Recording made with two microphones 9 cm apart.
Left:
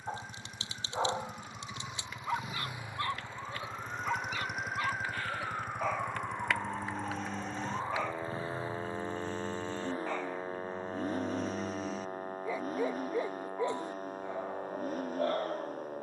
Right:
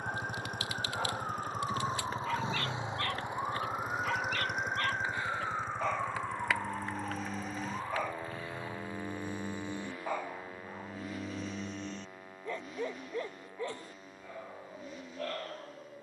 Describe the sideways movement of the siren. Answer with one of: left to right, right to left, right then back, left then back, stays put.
right to left.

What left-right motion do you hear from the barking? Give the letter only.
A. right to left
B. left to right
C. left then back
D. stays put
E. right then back
E.